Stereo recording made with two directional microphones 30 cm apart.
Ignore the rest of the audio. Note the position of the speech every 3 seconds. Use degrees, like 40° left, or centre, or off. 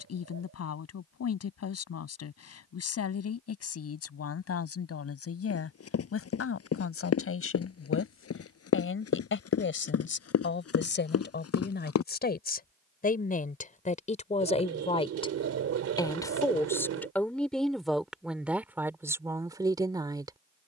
60° left, 50° left, 50° left, 40° left, 30° left, 10° left, 10° right.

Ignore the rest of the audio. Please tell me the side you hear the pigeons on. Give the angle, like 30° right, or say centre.
60° right.